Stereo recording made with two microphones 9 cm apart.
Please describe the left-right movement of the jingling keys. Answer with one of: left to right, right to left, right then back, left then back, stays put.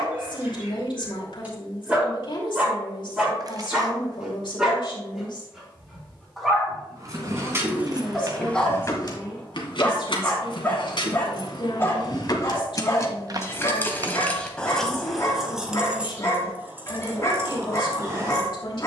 left then back.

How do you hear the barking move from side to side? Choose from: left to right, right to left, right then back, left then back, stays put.
right to left.